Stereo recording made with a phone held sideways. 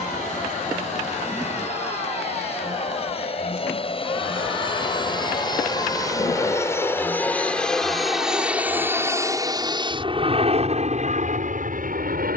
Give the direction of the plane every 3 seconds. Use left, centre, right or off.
left, left, centre, right.